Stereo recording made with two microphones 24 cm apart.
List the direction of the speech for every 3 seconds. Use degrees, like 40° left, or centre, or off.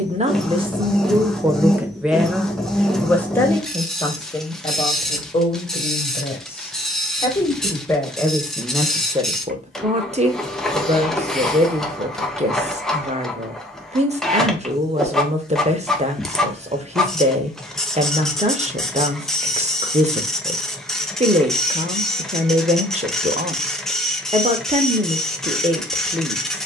10° right, 20° left, 10° left, 30° right, 30° right, 30° right, 30° right, 30° right, 30° right.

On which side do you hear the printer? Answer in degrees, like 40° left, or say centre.
centre.